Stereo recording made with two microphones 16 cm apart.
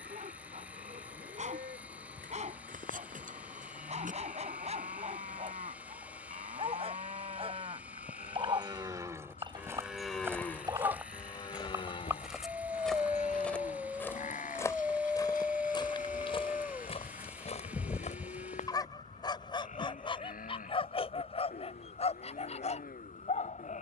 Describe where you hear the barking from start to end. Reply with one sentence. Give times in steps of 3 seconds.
In this clip you hear the barking on the right from 0 s, in the centre from 12 s and on the left from 18 s.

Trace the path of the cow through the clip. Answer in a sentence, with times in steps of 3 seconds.
In this clip you hear the cow on the right from 0 s, in the centre from 9 s and on the left from 12 s.